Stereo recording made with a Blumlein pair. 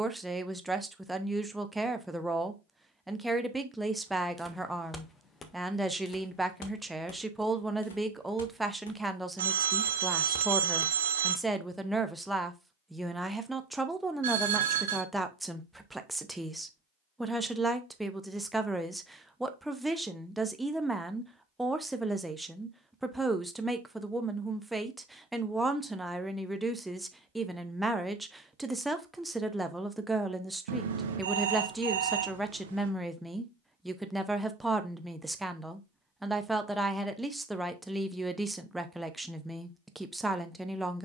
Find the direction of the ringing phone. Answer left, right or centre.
right.